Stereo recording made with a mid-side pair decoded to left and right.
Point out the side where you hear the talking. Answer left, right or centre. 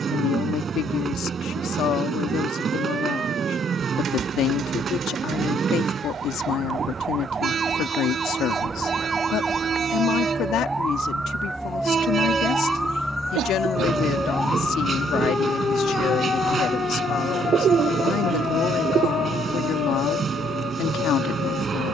left.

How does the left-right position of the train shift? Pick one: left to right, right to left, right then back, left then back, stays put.
stays put.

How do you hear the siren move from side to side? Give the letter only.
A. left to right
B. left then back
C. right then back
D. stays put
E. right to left
E.